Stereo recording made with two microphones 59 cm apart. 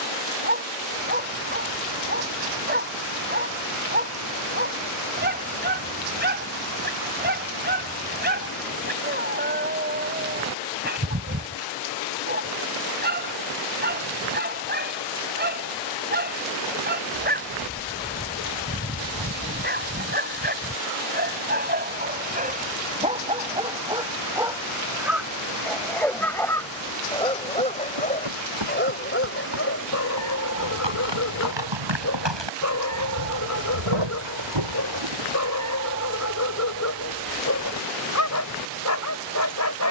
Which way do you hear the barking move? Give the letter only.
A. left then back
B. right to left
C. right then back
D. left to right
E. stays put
B.